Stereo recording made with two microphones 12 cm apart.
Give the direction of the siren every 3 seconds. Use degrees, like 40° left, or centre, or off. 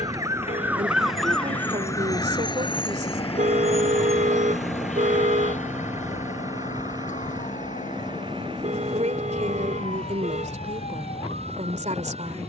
10° left, 60° left, 70° left, 80° left.